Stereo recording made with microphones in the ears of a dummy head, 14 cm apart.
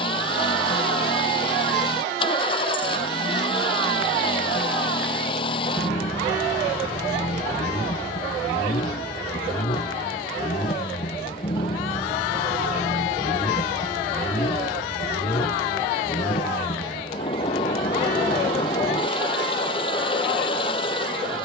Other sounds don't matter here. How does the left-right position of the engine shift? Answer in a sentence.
You can hear the engine stay put.